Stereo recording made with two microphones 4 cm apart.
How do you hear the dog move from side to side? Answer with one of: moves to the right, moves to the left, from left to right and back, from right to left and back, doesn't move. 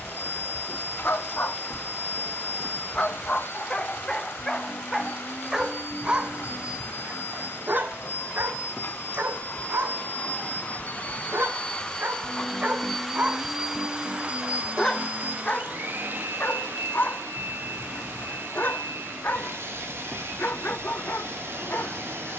from left to right and back.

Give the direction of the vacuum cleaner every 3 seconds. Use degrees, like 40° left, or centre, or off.
60° left, 60° left, 60° left, 40° left, 10° right, 50° right, 70° right, 70° right.